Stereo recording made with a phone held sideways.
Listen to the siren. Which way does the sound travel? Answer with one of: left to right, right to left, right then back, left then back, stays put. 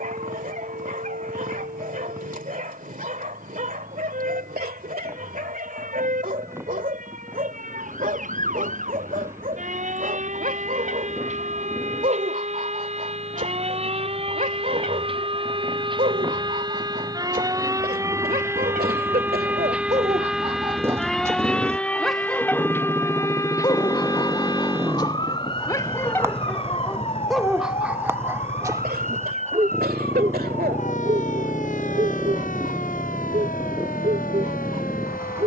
right to left.